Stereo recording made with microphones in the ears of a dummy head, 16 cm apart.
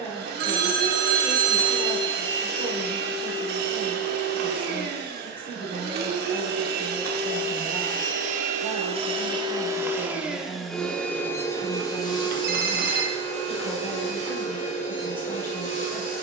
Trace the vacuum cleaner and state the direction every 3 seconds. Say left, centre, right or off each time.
right, right, right, centre, left, left.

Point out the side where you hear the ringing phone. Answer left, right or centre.
right.